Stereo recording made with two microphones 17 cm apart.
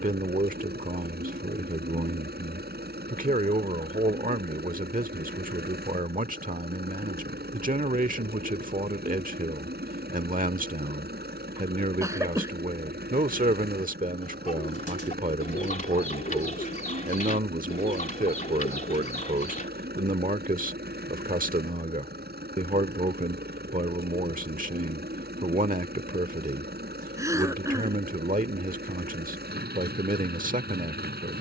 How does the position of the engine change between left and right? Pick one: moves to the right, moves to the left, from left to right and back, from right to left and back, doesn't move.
doesn't move.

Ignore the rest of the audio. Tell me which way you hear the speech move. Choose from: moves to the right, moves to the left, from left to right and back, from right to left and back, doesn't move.
doesn't move.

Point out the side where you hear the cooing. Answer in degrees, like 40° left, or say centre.
50° left.